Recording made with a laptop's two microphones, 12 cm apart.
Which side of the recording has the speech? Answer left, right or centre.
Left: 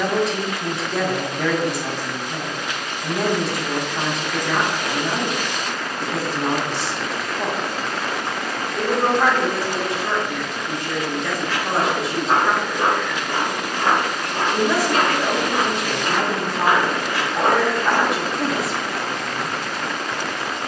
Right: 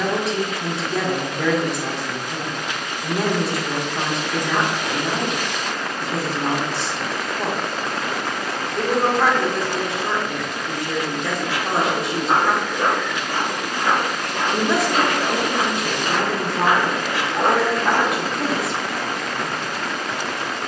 centre.